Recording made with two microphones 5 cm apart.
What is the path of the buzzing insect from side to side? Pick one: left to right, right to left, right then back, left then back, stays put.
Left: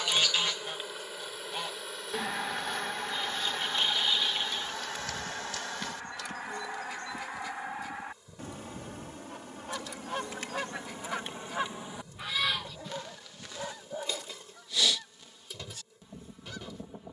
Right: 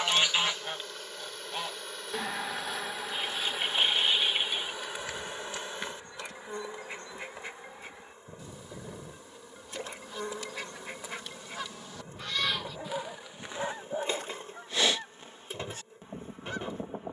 left to right.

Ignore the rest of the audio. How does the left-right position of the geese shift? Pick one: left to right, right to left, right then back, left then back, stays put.
left then back.